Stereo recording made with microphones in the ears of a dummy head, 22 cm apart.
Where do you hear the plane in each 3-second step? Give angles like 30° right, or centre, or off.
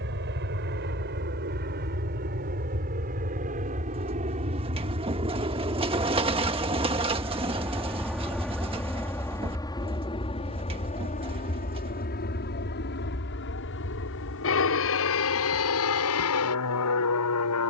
40° right, 30° right, 10° right, 20° left, 50° left, 60° left.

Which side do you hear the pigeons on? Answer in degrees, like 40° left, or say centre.
20° right.